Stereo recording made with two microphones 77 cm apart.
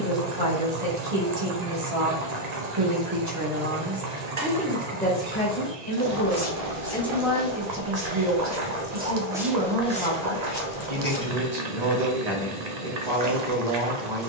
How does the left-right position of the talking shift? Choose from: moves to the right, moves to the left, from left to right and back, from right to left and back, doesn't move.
from right to left and back.